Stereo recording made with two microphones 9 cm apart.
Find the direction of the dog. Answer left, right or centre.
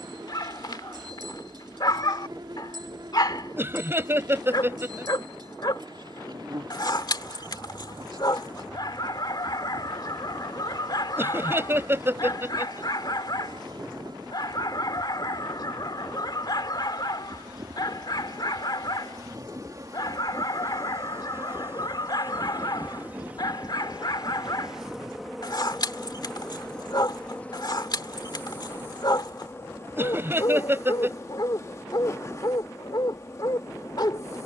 left.